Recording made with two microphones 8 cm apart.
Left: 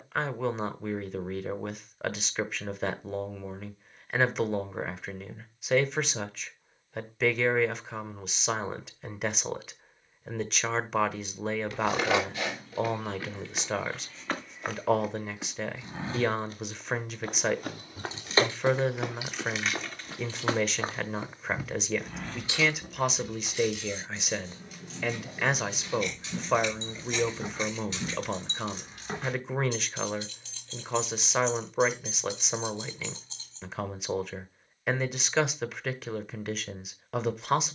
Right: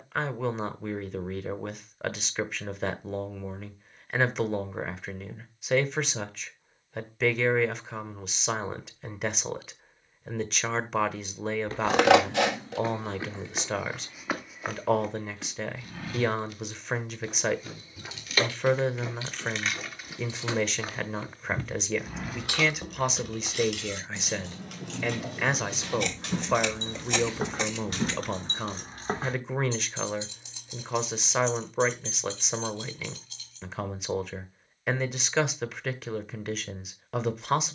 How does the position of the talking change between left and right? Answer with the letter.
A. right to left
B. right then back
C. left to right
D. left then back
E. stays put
E.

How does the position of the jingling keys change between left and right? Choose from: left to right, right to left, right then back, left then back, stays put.
right then back.